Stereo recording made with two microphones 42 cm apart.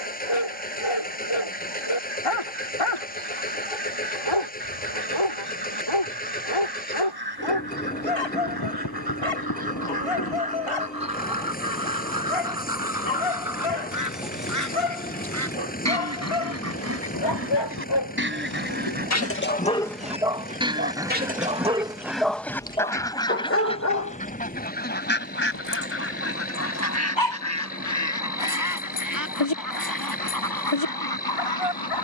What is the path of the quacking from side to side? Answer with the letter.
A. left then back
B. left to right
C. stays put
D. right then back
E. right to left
E.